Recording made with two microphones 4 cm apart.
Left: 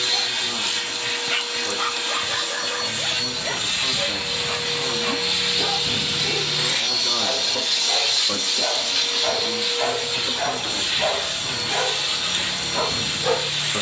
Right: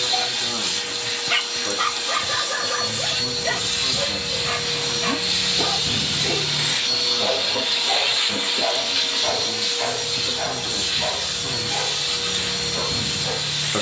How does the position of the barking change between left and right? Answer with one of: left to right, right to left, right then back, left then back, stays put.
right to left.